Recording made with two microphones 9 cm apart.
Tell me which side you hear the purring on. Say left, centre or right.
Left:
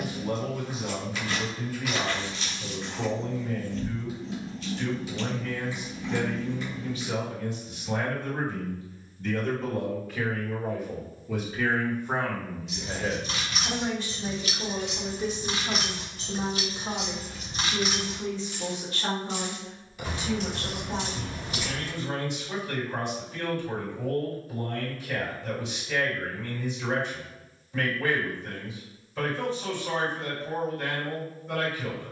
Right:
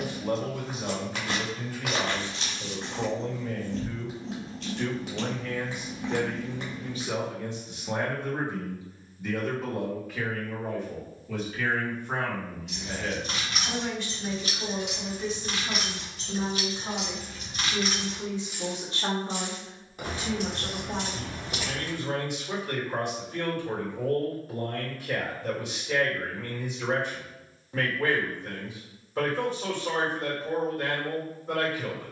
right.